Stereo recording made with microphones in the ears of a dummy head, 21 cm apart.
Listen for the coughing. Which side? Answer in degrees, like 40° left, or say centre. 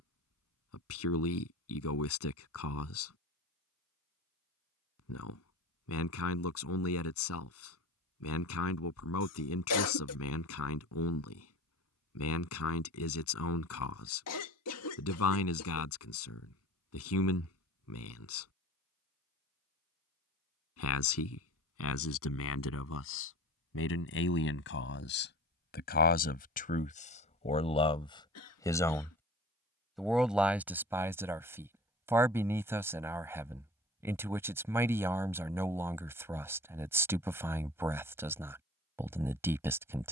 70° left.